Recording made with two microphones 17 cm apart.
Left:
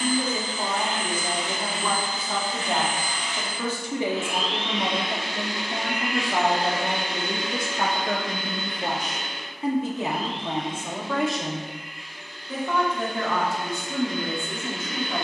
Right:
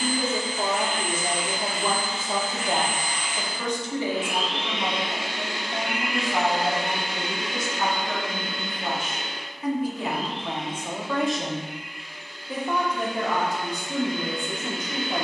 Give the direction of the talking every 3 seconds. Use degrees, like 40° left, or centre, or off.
20° right, 40° left, 60° left, 10° left, 20° right.